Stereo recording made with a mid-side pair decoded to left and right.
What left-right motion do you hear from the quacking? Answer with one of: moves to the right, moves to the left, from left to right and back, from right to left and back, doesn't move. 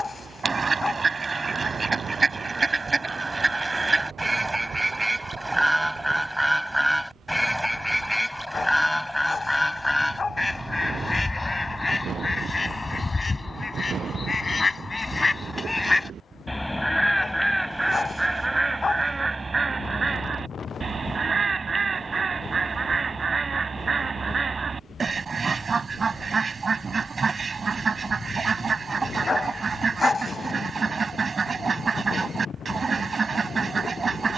from right to left and back.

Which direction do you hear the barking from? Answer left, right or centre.
left.